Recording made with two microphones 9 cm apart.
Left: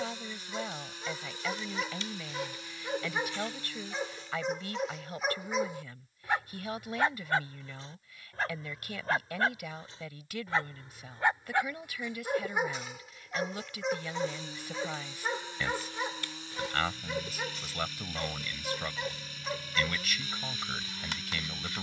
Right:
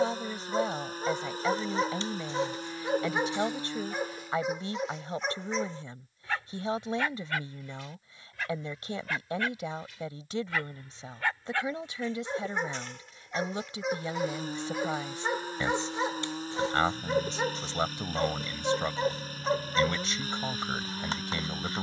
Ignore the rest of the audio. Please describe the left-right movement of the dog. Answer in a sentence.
In this clip you hear the dog go left and come back.